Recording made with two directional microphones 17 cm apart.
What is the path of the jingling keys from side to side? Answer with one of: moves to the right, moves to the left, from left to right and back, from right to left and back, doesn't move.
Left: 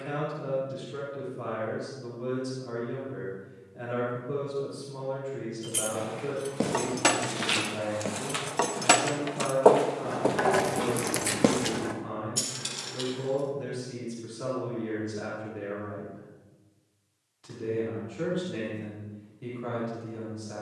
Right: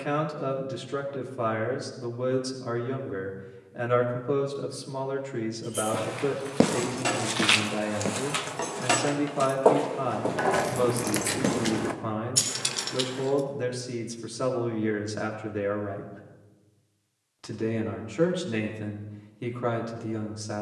moves to the right.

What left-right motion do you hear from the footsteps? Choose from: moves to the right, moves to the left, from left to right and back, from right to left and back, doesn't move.
moves to the left.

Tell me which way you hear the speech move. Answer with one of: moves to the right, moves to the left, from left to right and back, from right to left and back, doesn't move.
doesn't move.